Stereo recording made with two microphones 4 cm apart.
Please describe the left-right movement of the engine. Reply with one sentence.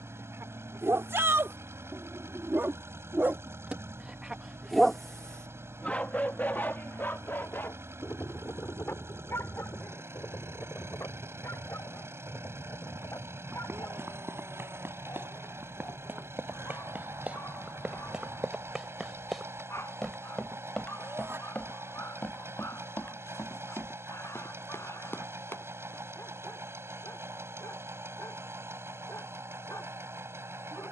You can hear the engine stay in one place.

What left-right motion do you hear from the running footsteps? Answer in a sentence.
In this clip you hear the running footsteps go from the right side to the left.